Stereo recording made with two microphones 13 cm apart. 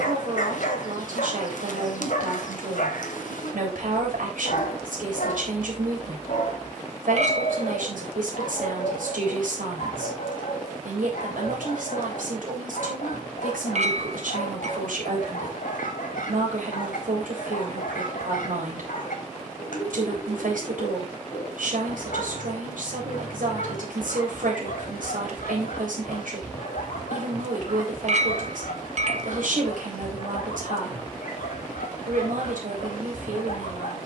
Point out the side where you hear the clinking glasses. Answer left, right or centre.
right.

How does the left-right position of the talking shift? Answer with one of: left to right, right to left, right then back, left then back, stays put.
stays put.